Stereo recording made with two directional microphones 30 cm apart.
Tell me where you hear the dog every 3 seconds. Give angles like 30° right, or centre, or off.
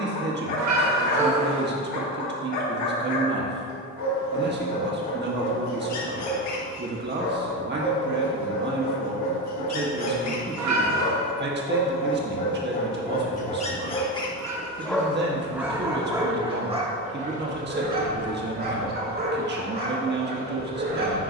70° left, 70° left, 70° left, 60° left, 20° left, 20° right, 30° right.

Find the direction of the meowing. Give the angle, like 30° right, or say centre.
60° right.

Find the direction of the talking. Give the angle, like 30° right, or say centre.
40° right.